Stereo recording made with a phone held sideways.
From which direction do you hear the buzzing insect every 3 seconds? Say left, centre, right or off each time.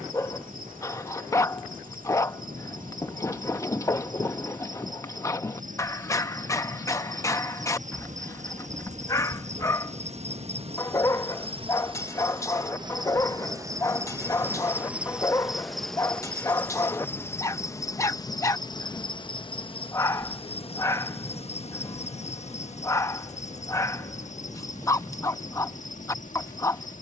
right, right, right, right, right, centre, left, left, left.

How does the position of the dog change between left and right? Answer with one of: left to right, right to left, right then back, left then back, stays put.
stays put.